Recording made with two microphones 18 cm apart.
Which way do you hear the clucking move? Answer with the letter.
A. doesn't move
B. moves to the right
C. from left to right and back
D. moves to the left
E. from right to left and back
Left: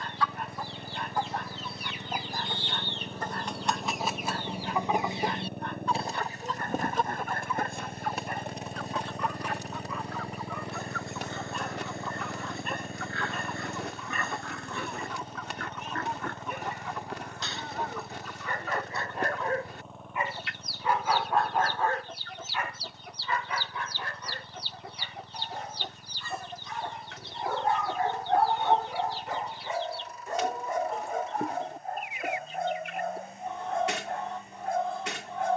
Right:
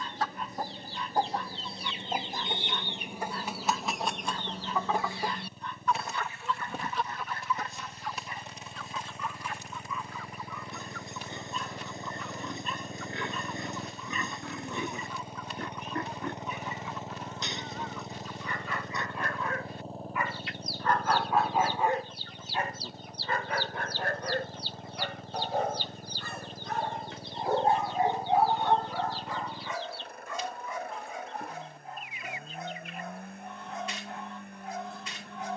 D.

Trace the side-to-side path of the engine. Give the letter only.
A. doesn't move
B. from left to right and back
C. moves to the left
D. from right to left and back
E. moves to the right
E.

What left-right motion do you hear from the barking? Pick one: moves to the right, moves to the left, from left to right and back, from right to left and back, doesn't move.
from left to right and back.